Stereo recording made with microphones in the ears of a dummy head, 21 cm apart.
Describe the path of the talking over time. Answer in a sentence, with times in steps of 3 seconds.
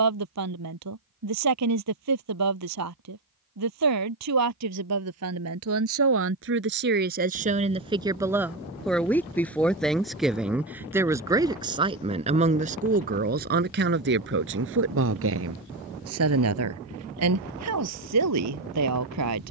You can hear the talking on the right from 0 s, in the centre from 9 s and on the right from 12 s.